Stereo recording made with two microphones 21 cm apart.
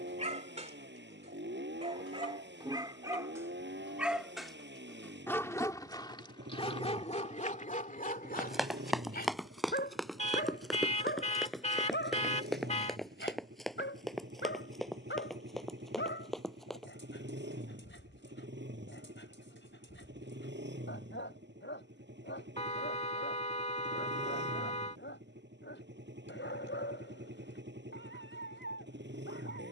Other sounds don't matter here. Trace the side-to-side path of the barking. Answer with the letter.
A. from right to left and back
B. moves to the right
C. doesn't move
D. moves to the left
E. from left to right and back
D.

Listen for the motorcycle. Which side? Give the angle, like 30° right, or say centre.
60° right.